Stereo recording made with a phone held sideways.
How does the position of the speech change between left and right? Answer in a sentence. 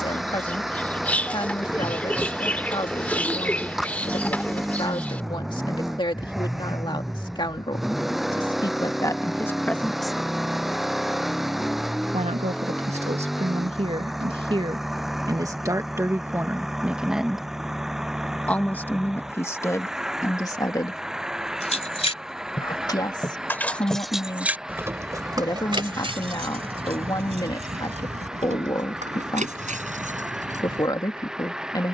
You can hear the speech go right and come back.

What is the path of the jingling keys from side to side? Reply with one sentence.
In this clip you hear the jingling keys travel towards the right.